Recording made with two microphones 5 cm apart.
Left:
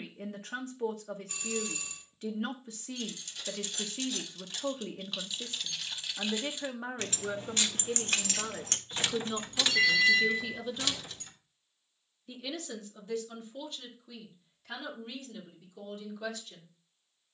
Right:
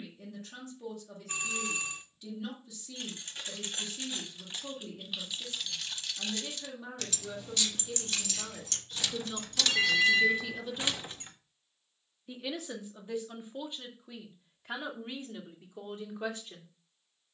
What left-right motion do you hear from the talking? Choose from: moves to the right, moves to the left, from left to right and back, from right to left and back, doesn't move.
moves to the right.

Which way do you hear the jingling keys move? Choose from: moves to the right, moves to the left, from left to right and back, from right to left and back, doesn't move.
from right to left and back.